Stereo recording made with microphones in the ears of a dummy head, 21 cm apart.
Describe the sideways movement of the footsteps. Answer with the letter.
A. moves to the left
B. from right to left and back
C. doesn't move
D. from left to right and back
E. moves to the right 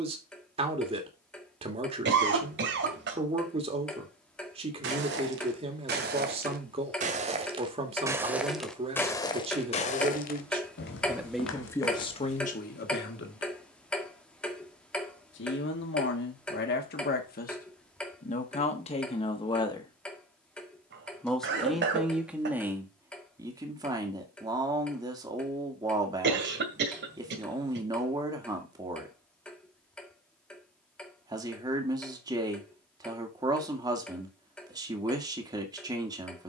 A.